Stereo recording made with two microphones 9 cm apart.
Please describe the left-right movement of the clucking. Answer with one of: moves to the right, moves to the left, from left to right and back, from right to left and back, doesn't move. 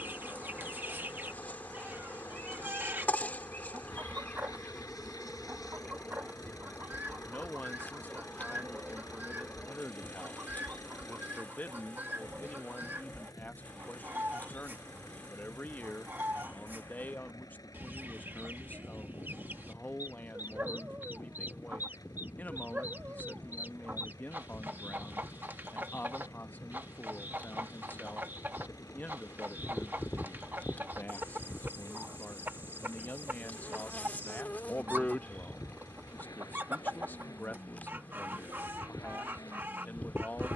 doesn't move.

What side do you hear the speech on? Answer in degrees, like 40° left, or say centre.
20° left.